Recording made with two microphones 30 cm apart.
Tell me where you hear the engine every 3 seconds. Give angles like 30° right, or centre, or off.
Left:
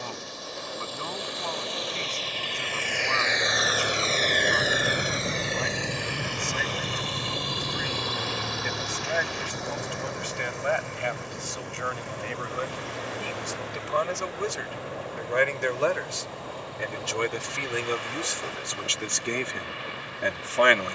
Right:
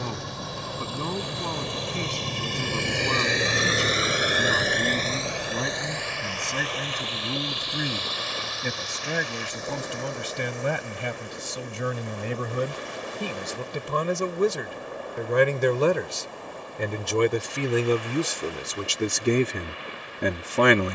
60° right, centre, 60° left, 70° left, 80° left, 80° left, 80° left.